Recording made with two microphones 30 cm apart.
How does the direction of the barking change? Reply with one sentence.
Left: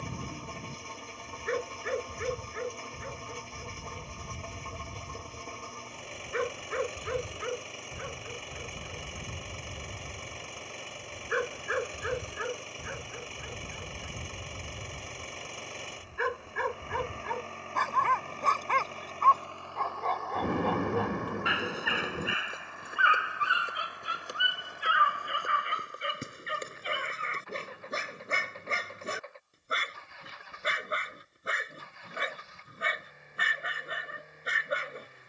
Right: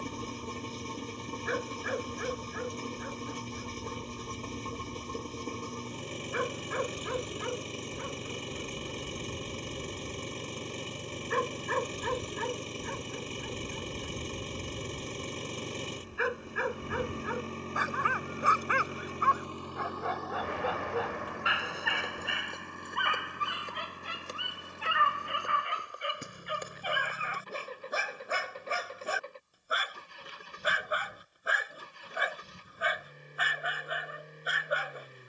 You can hear the barking move from left to right and back again.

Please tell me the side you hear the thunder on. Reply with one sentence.
You can hear the thunder on the left.